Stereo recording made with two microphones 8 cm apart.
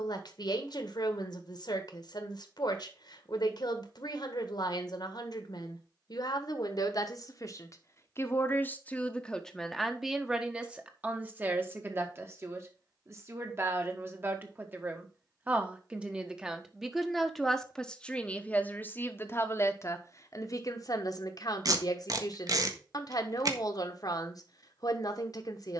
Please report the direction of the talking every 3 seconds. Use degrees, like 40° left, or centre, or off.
70° left, 70° left, 50° left, 10° right, 30° right, 10° right, 30° left, 60° left, 60° left.